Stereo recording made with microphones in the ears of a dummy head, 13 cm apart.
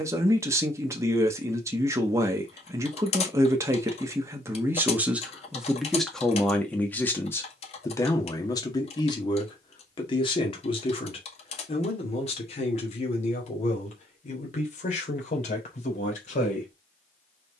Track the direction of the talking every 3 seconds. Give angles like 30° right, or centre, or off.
20° right, 10° right, 20° left, 30° left, 50° left, 50° left.